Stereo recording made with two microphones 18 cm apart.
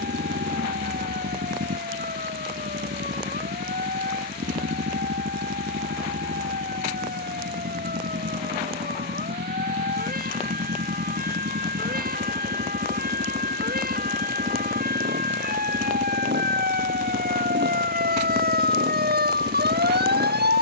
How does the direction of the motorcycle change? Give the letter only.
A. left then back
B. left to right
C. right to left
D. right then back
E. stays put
E.